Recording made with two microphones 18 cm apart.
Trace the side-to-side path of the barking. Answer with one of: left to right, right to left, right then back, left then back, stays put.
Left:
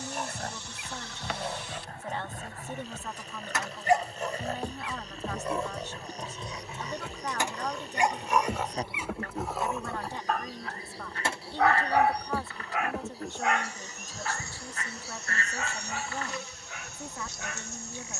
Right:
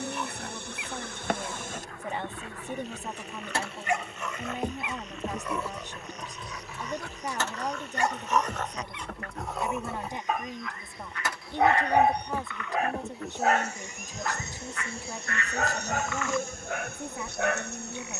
left to right.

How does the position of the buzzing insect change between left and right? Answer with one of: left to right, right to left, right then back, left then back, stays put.
left then back.